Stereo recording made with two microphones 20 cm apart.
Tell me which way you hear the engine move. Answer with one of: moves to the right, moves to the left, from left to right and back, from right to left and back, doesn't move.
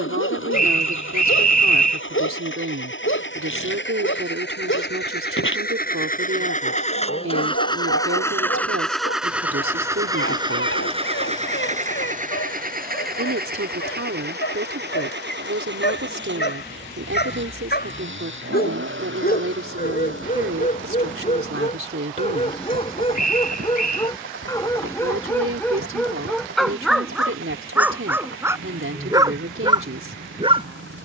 moves to the right.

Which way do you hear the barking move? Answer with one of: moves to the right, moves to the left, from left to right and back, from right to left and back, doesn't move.
moves to the right.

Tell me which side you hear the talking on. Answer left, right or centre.
right.